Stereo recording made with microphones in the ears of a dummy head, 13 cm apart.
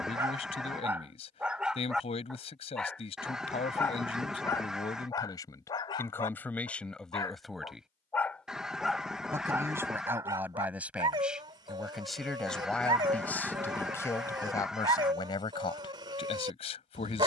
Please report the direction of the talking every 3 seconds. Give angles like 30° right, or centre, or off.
40° left, 30° left, 10° left, 10° right, 10° left, 30° left.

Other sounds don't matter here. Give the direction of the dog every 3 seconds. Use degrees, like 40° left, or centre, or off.
10° right, 20° left, 20° left, 20° right, 30° right, 30° right.